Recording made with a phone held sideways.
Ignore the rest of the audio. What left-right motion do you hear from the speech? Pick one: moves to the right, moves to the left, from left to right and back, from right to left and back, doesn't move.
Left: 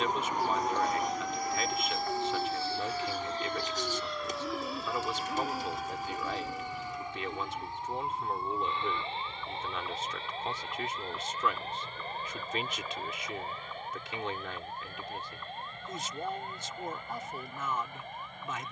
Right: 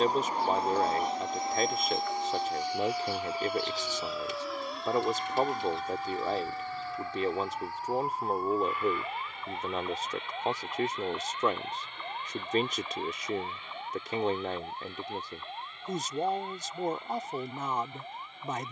doesn't move.